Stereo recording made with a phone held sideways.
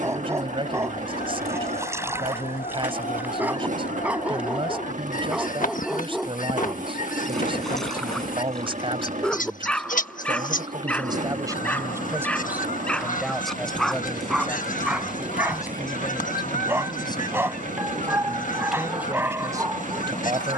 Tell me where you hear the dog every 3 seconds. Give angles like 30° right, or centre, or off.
20° right, 10° right, centre, 10° left, centre, 10° right, 20° right.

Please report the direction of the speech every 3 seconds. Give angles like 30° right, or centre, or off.
40° right, 40° right, 40° right, 30° right, centre, 30° left, 20° right.